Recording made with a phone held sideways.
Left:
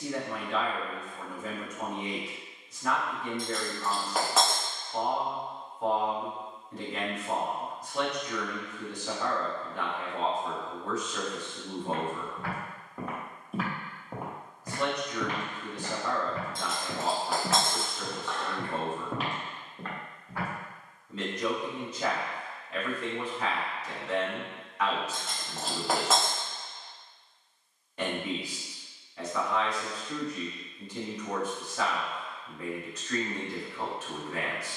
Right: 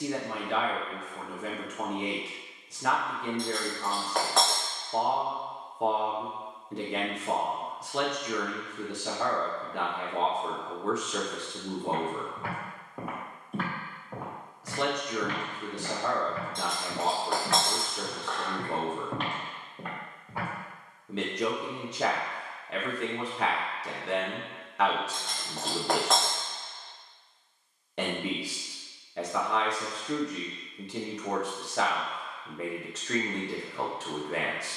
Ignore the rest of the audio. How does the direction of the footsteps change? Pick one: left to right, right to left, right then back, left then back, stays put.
left then back.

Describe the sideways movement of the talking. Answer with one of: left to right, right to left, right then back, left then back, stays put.
stays put.